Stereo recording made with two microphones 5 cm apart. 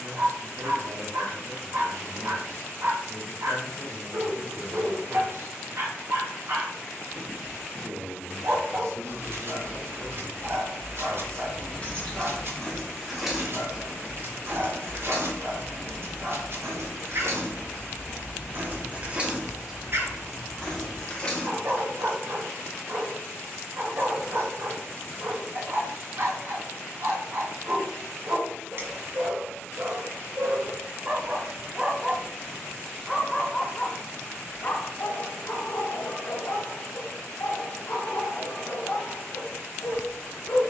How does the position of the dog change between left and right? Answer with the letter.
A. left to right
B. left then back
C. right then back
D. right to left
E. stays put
D.